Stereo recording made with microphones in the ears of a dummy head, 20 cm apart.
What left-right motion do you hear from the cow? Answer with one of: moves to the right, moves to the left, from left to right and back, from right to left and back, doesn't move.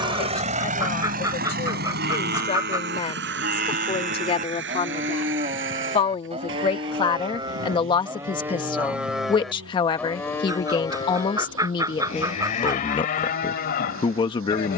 moves to the left.